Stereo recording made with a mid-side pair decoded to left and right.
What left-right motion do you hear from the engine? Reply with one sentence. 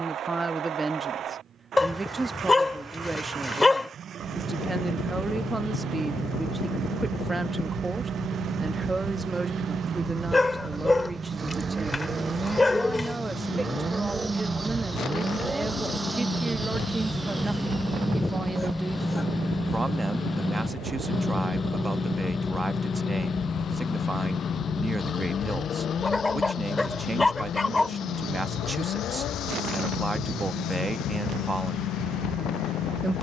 In this clip you hear the engine move from right to left.